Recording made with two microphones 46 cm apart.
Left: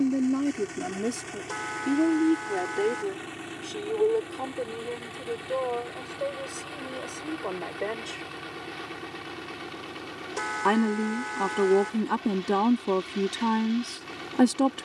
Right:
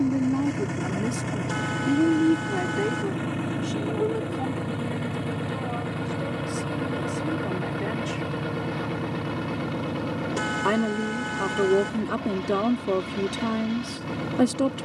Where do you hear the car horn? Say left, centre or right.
right.